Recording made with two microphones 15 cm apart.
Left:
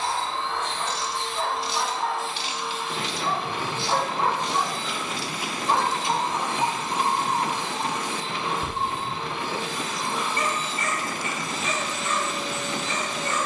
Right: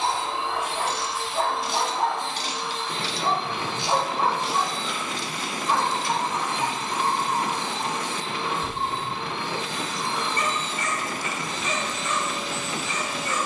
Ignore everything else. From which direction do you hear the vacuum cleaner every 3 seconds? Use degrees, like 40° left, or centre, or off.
centre, 10° left, 20° left, 10° left, centre.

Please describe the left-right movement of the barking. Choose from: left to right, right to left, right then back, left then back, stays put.
right to left.